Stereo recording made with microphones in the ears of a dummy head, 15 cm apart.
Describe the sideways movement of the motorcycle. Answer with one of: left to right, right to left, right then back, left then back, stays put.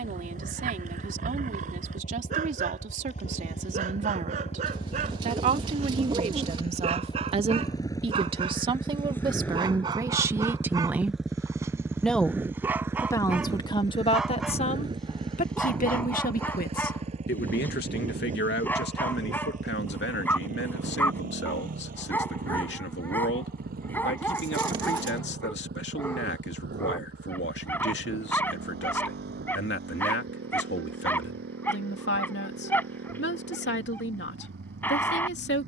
left to right.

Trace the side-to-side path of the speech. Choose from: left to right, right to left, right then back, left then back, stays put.
right to left.